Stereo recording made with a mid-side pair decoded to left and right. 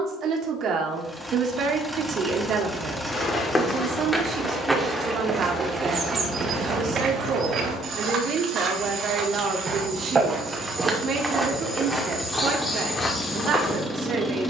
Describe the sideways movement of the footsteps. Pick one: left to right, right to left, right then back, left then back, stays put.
right then back.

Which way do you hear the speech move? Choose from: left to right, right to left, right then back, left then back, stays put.
stays put.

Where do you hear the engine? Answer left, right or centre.
centre.